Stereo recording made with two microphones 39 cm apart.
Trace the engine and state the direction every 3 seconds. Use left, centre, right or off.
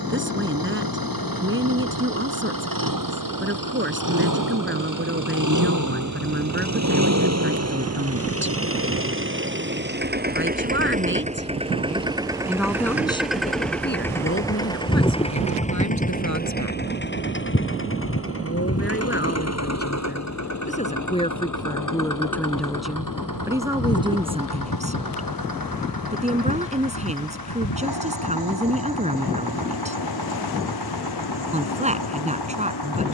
right, right, right, right, centre, left, left, left, left, left, left.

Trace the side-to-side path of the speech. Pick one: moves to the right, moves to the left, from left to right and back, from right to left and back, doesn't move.
from right to left and back.